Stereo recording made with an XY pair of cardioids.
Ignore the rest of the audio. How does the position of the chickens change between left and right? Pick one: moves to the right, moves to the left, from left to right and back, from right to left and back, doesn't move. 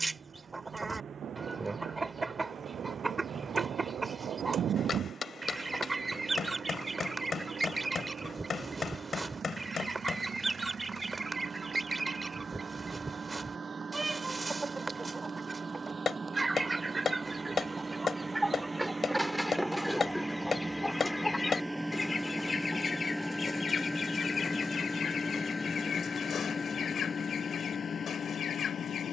moves to the left.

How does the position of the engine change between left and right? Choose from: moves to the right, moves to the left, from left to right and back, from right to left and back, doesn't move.
moves to the left.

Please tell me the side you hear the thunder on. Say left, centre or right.
right.